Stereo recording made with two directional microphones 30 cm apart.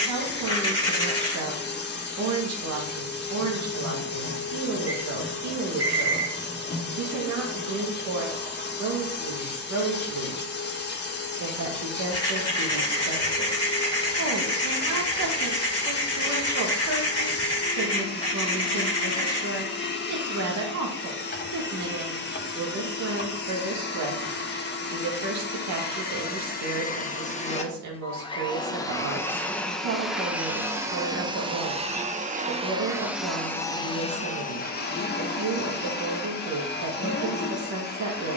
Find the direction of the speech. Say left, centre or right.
right.